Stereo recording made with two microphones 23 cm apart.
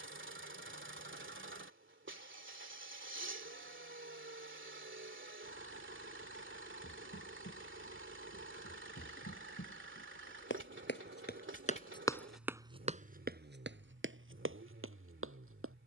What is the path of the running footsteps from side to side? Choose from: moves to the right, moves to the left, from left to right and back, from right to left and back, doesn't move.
moves to the right.